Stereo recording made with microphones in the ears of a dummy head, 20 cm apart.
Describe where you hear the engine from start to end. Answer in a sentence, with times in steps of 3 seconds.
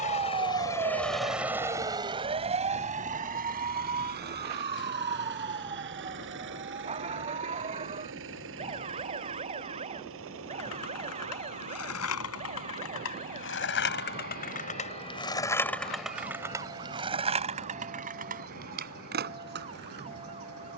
You can hear the engine in the centre from 0 s and on the right from 3 s.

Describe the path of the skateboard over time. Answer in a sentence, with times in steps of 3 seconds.
You can hear the skateboard not at all from 0 s, on the left from 9 s, in the centre from 15 s and on the right from 18 s.